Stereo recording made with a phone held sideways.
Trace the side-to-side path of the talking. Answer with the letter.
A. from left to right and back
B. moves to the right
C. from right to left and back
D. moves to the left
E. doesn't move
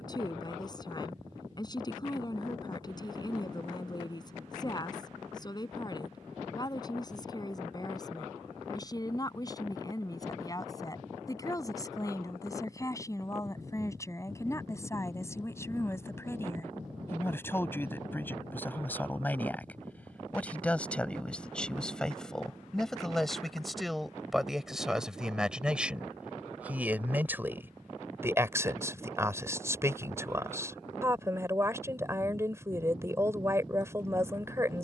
B.